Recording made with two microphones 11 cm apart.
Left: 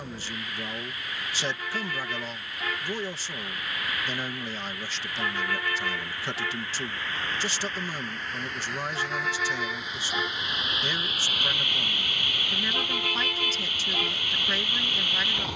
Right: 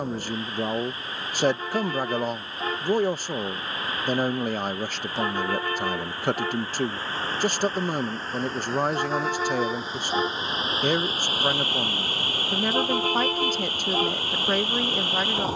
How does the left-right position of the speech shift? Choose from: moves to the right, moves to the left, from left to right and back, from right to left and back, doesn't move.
doesn't move.